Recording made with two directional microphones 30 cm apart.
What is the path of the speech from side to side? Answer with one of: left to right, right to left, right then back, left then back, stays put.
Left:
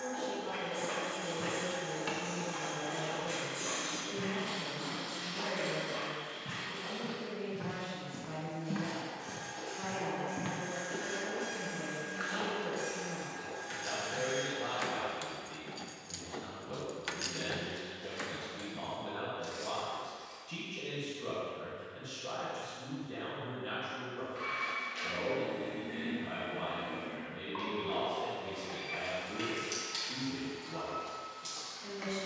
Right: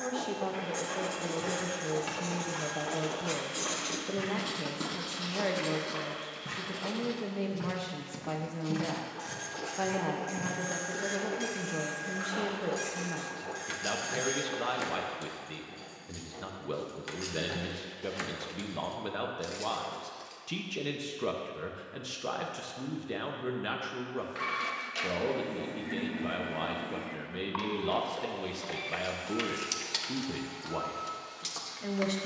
stays put.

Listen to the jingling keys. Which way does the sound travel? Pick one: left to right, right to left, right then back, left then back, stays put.
left then back.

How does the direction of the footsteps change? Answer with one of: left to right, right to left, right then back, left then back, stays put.
right then back.